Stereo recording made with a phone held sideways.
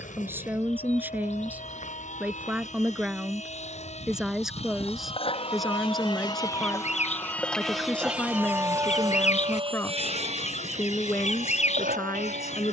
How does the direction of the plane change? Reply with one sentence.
In this clip you hear the plane move from left to right.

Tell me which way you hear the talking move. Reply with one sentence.
In this clip you hear the talking go from the right side to the left.